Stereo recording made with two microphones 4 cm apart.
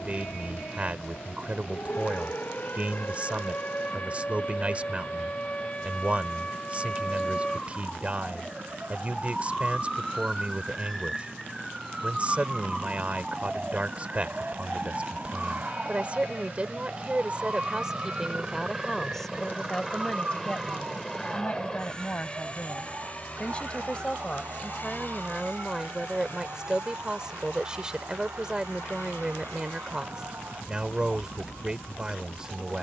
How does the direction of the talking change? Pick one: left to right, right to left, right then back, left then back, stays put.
left then back.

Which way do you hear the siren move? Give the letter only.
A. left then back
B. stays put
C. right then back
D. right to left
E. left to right
E.